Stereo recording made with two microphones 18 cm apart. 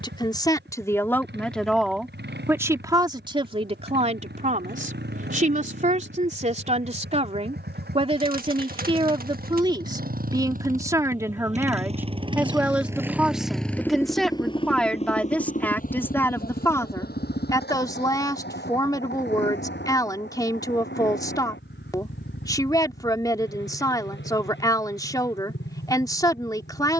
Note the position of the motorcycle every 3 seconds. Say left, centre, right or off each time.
right, right, right, right, centre, left, left, left, left.